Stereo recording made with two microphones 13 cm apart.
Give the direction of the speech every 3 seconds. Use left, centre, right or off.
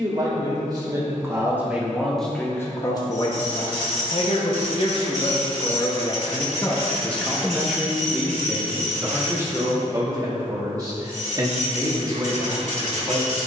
centre, left, centre, right, right.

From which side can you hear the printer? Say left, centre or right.
right.